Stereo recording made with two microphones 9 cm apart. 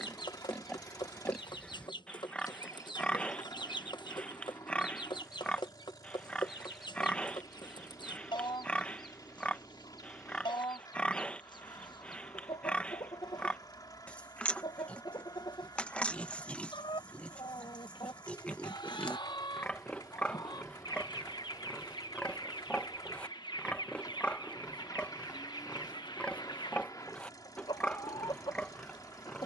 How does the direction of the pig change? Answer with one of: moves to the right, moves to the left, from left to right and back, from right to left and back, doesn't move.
doesn't move.